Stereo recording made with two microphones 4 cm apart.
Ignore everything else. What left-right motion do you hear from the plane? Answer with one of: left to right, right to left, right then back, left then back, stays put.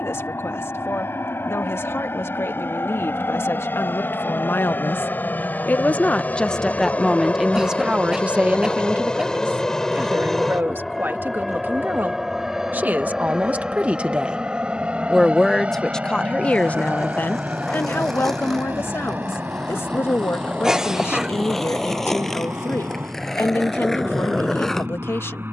left to right.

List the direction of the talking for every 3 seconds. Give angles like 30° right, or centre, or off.
70° left, 60° left, 10° right, 50° right, 40° right, 20° left, 60° left, 70° left, 70° left.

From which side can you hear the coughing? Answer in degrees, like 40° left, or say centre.
10° right.